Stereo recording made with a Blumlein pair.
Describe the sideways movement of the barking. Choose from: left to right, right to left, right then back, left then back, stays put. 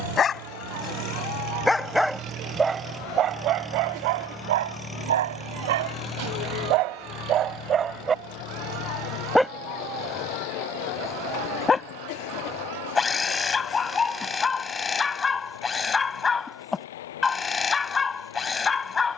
right then back.